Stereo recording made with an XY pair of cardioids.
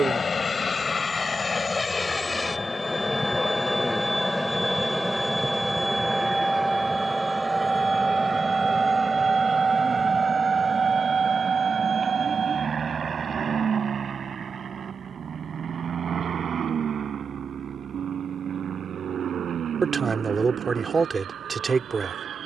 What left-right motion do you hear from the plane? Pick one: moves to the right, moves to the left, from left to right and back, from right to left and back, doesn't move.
moves to the right.